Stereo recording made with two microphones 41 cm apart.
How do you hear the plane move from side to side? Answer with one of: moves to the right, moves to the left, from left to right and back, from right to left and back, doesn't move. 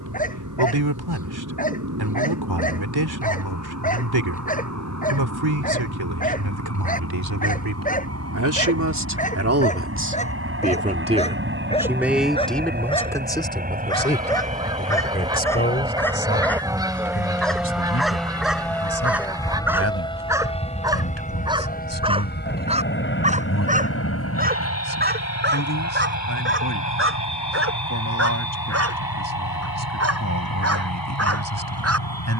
moves to the left.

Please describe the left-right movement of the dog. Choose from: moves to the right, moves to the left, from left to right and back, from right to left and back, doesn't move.
moves to the right.